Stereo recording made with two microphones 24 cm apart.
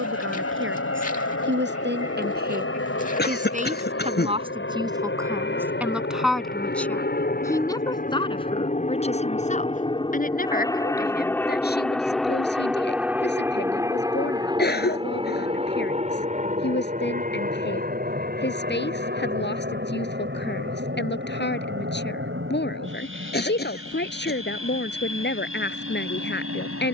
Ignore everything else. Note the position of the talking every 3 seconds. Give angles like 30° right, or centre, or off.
50° right, 20° right, 10° left, 40° left, 50° left, 50° left, 50° left, 50° left, 50° left.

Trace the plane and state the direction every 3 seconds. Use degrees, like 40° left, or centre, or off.
70° left, 60° left, 40° left, 20° left, 10° right, 30° right, 40° right, 50° right, 50° right.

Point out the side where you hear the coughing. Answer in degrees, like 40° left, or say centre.
40° left.